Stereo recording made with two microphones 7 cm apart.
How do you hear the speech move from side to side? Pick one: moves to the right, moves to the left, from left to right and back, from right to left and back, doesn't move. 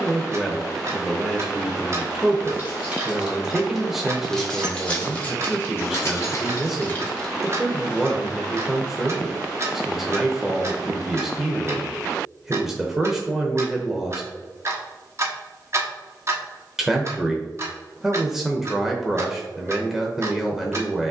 doesn't move.